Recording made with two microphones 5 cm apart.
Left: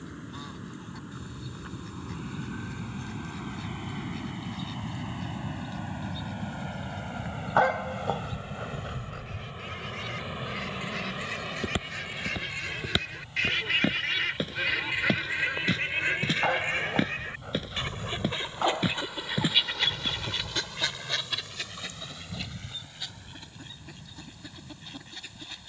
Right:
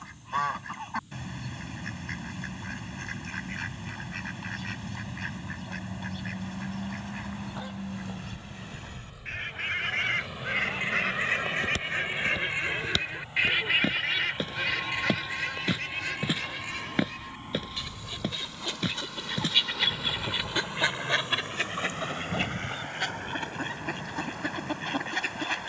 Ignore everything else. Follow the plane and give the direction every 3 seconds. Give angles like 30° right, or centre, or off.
80° left, 70° left, 40° left, 10° left, 20° right, 40° right, 50° right, 60° right, 60° right.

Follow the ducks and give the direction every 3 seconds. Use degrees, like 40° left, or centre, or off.
60° right, 60° right, 60° right, 50° right, 10° right, 30° left, 10° left, 50° right, 60° right.